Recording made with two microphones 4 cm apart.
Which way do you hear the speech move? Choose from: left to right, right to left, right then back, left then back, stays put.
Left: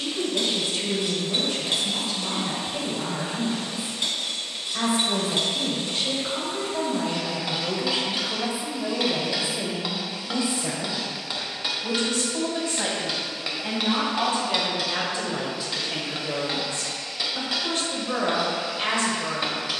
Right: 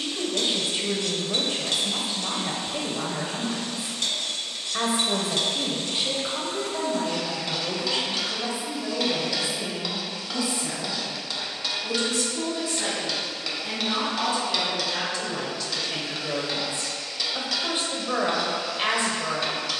left then back.